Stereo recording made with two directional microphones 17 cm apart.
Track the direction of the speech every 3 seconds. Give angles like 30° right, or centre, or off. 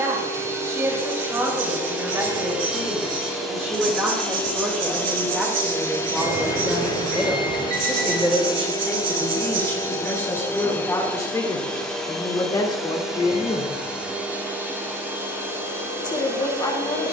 20° right, 10° right, centre, 10° left, 20° left, 30° left.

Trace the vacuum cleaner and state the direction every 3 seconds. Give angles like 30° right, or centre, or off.
10° right, 10° left, 20° left, 10° left, centre, 10° right.